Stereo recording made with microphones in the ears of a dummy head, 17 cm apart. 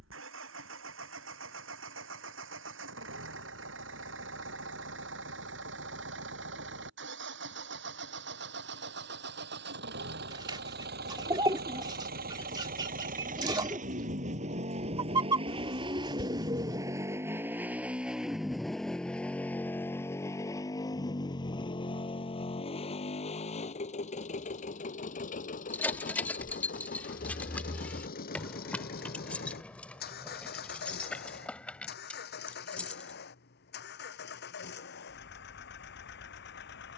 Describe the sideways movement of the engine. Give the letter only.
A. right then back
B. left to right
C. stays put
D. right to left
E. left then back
D.